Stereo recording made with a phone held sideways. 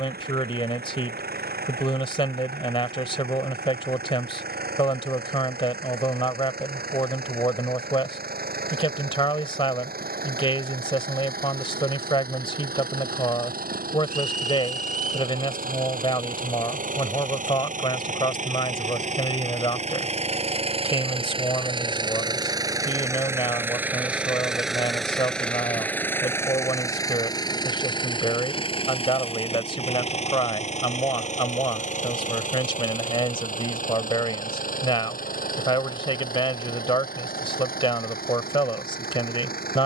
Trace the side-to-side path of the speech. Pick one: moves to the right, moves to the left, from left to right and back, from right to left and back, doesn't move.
doesn't move.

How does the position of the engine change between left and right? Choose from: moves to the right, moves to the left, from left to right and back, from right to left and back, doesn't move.
moves to the left.